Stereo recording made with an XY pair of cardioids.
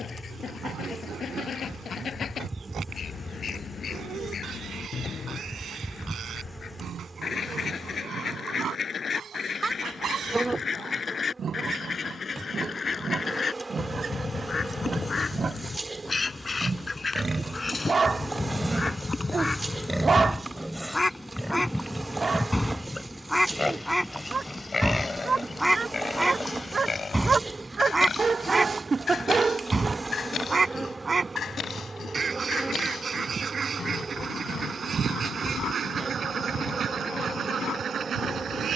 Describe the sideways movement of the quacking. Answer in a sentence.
You can hear the quacking move to the right.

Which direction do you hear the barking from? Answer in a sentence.
You can hear the barking on the right.